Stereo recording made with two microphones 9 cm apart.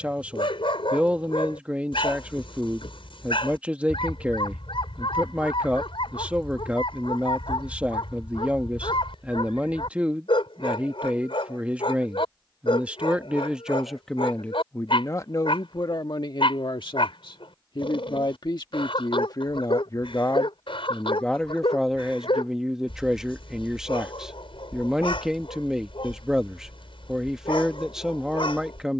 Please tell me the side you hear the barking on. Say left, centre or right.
left.